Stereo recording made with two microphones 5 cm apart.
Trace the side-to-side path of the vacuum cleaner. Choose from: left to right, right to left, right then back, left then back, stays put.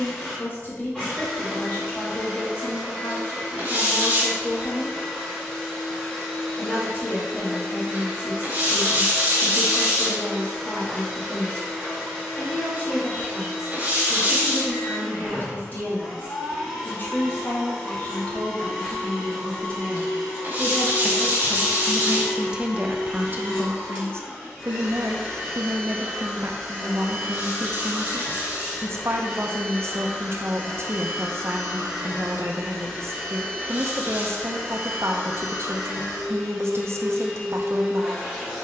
stays put.